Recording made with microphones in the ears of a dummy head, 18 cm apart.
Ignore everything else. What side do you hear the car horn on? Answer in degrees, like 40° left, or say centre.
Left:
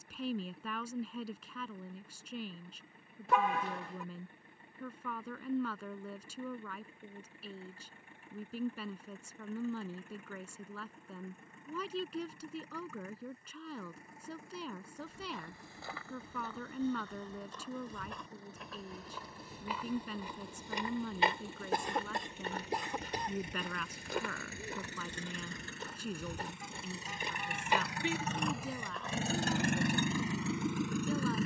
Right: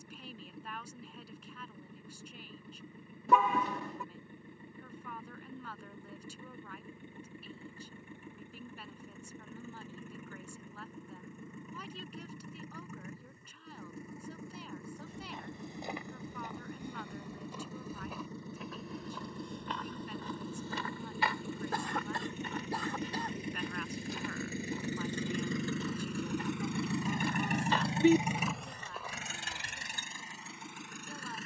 80° right.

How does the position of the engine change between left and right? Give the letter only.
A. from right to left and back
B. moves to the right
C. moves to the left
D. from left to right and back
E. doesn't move
C.